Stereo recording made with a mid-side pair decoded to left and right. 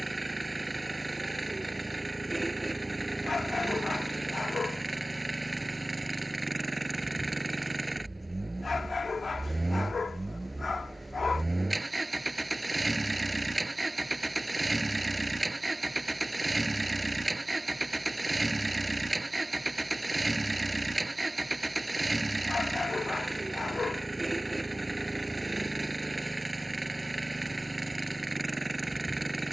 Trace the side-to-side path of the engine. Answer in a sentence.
You can hear the engine stay put.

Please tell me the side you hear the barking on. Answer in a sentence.
You can hear the barking on the left.